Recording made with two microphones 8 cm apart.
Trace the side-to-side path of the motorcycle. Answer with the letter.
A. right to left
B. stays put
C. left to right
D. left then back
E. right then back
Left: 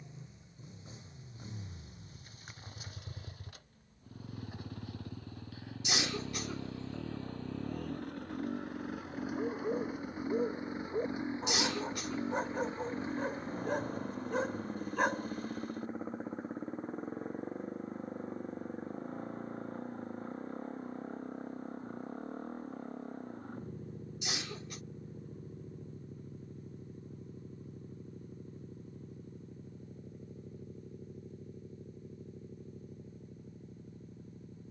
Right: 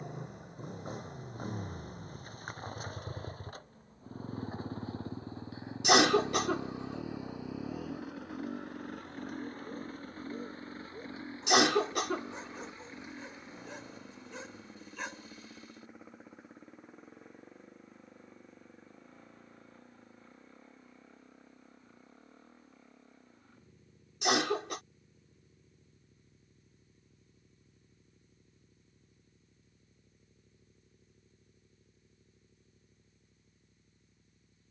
A.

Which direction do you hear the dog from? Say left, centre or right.
left.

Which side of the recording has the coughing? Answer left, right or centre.
right.